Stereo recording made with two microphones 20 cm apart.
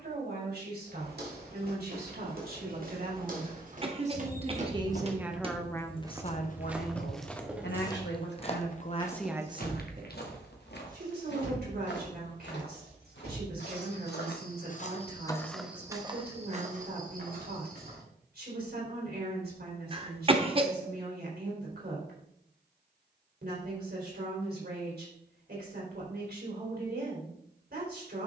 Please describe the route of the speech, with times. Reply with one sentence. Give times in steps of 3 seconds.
In this clip you hear the speech on the right from 0 s, on the left from 6 s and on the right from 9 s.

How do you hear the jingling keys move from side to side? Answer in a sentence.
You can hear the jingling keys go from the left side to the right.